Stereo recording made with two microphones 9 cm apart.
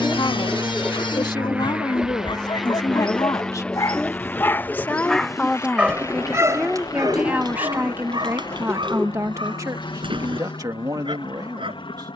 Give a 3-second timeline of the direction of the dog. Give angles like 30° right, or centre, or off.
60° left, 20° left, 50° right, 70° right.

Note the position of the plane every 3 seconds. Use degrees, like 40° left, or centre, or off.
10° right, 20° left, 40° left, 60° left.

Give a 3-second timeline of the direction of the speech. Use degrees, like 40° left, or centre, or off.
50° left, 20° left, 20° right, 40° right.